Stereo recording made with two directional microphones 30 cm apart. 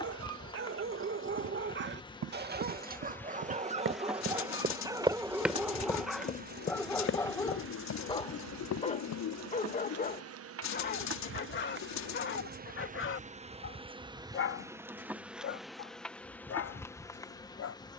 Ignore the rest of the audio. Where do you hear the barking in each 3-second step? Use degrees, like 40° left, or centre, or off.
40° right, 10° right, 10° left, 30° left, 40° left, 50° left.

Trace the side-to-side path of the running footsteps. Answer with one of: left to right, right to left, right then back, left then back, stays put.
right to left.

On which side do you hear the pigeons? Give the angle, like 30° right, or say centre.
60° left.